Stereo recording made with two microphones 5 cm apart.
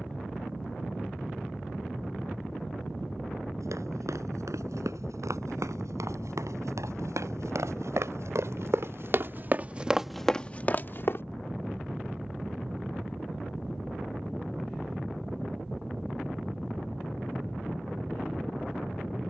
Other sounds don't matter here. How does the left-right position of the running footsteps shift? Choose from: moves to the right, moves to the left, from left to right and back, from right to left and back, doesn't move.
moves to the left.